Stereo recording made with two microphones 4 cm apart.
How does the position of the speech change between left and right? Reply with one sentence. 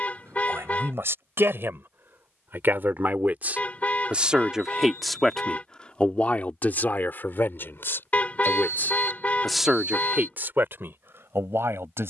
In this clip you hear the speech go left and come back.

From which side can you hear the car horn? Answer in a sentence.
You can hear the car horn on the left.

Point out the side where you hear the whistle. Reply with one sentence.
In this clip you hear the whistle on the left.